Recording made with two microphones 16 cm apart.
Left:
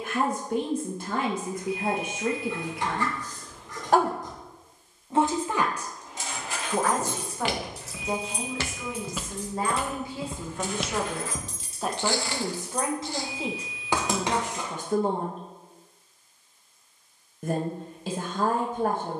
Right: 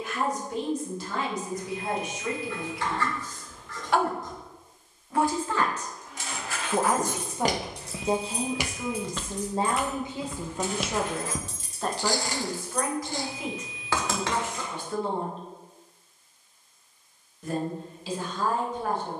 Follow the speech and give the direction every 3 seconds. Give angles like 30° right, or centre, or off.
60° left, 30° left, 20° right, 20° right, 30° left, 50° left, 60° left.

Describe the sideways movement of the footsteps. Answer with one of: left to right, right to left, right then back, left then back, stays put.
left then back.